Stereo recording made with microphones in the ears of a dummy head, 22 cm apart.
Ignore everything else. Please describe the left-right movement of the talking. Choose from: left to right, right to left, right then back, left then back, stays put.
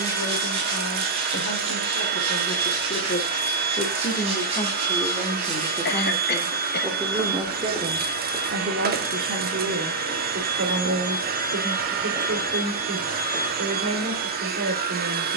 left to right.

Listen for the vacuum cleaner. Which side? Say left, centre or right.
right.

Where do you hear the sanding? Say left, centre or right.
right.